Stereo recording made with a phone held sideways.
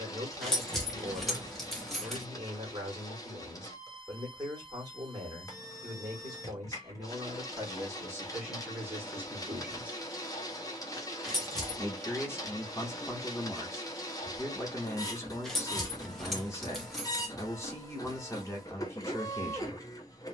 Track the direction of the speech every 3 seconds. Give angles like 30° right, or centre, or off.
30° right, 30° right, 20° right, 10° right, 20° left, 20° left, 20° left.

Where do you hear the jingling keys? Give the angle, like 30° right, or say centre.
centre.